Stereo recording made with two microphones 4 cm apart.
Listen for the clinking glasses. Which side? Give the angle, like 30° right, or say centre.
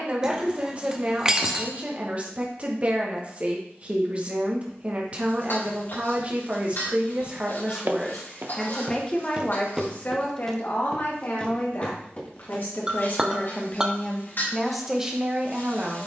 20° right.